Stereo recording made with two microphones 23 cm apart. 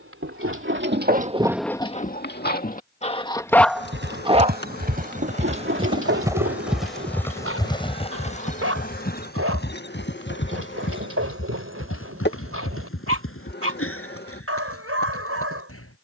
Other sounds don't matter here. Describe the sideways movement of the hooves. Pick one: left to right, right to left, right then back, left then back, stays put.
right to left.